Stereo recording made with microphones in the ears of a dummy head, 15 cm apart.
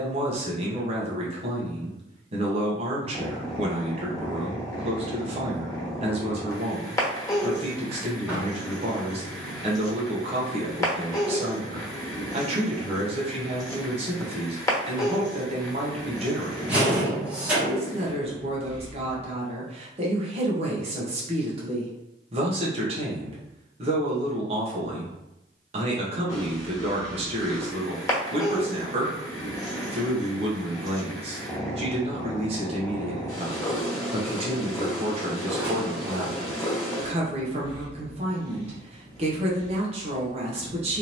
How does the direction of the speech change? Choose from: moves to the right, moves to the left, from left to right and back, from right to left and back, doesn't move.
doesn't move.